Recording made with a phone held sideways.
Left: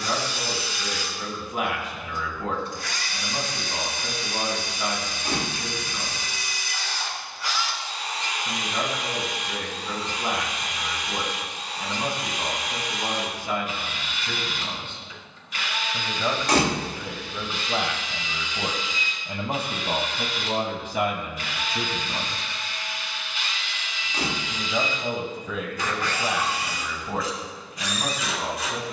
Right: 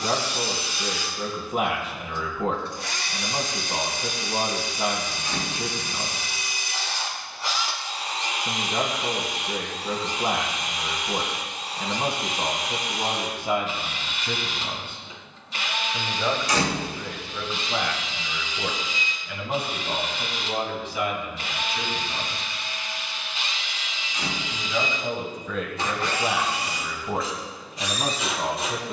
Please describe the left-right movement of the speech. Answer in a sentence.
In this clip you hear the speech go left and come back.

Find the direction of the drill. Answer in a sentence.
In this clip you hear the drill on the right.